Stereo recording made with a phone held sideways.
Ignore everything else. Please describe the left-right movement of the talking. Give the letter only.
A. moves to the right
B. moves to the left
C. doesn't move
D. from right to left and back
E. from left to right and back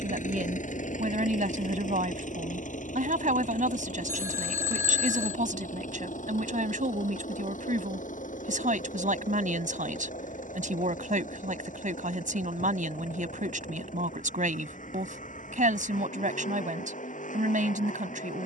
C.